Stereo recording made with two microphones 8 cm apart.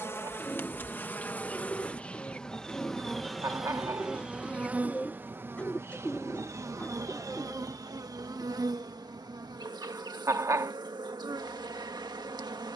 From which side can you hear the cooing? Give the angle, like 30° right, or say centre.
20° left.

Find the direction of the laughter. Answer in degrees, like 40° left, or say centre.
40° right.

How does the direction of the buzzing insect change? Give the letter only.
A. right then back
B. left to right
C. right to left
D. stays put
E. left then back
B.